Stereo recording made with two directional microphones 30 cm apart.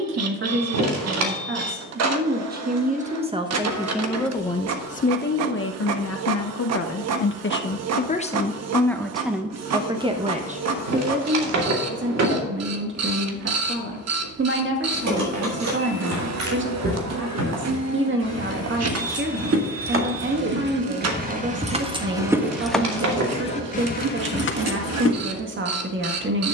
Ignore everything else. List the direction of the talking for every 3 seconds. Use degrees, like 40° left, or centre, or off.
40° right, 10° left, 40° left, 20° right, 40° right, 40° right, 40° right, 40° right, 40° right.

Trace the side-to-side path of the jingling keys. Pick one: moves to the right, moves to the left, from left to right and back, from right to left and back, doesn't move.
moves to the left.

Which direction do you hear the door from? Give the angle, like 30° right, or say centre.
60° right.